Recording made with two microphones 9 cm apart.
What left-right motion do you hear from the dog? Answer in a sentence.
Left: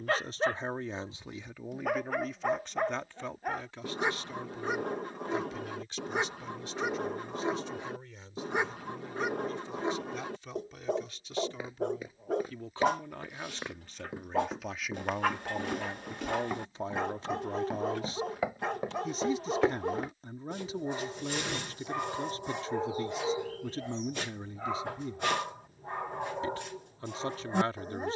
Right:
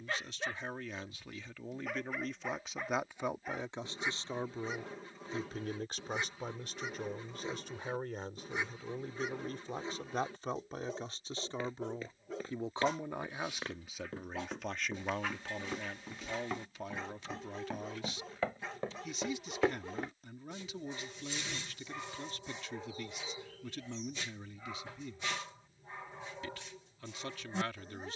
In this clip you hear the dog stay put.